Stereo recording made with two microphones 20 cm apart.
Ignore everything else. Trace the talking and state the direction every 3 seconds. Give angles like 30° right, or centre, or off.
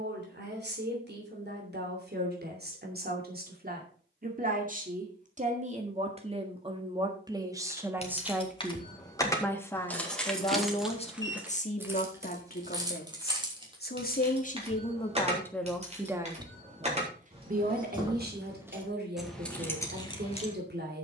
60° right, 40° right, 20° right, 20° left, 40° left, 20° right, 50° right.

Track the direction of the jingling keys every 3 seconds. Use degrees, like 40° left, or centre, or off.
off, off, 30° left, centre, 20° right, 30° right, centre.